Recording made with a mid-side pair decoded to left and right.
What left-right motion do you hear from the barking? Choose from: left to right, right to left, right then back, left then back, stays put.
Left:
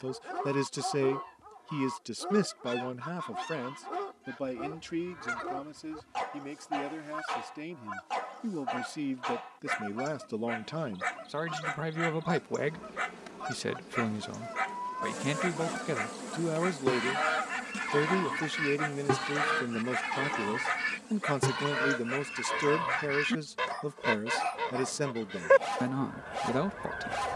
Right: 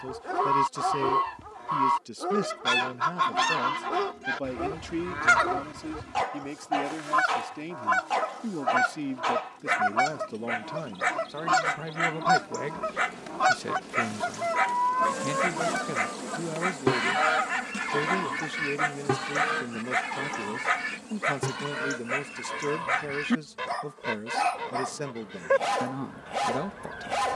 stays put.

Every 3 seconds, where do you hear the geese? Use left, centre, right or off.
right, right, right, right, right, right, centre, centre, centre.